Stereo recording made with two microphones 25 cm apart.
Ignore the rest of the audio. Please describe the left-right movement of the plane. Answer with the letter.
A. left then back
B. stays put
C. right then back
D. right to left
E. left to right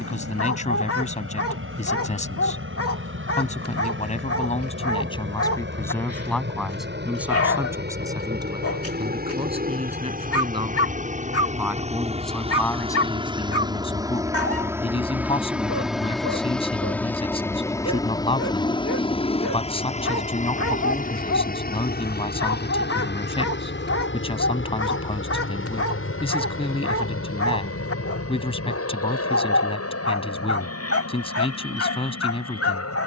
D.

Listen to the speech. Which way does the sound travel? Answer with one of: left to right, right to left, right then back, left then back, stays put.
right then back.